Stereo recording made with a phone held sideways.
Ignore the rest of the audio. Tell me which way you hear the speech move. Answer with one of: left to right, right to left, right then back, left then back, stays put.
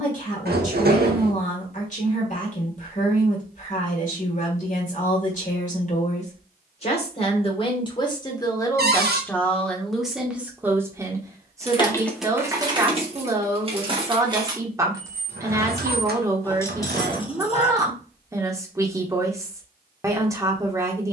left to right.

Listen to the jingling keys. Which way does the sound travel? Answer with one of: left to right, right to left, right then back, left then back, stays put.
right then back.